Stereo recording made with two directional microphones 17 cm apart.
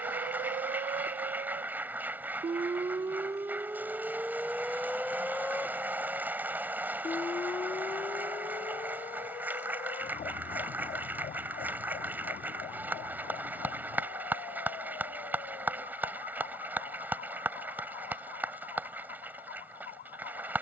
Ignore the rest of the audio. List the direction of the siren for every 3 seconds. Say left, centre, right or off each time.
right, centre, left, left, left, left, left.